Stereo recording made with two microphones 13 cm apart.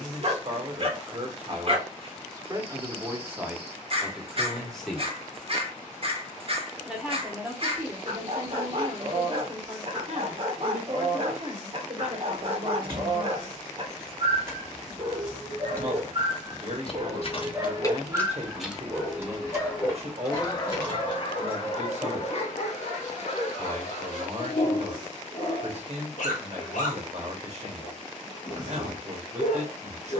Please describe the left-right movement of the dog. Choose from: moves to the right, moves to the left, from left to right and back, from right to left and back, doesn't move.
moves to the left.